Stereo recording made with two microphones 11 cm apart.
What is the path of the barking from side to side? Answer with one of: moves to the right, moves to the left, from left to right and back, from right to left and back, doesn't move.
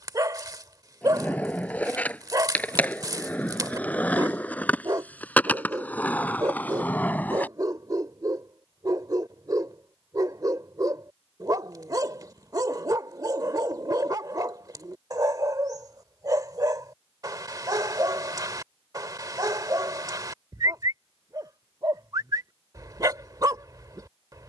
doesn't move.